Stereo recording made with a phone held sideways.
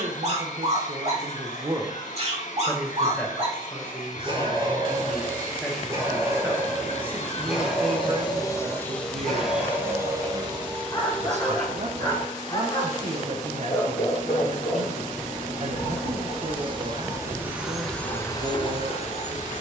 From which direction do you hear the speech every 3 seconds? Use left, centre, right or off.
right, centre, right, right, right, right, right.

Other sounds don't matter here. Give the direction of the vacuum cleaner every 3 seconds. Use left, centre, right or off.
left, left, left, right, right, right, left.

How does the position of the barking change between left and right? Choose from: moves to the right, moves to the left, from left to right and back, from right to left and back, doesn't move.
moves to the left.